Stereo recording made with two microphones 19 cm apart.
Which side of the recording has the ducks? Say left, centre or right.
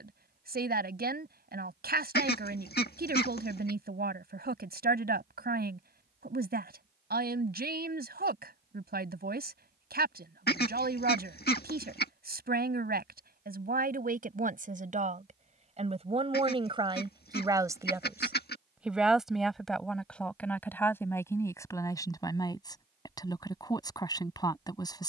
left.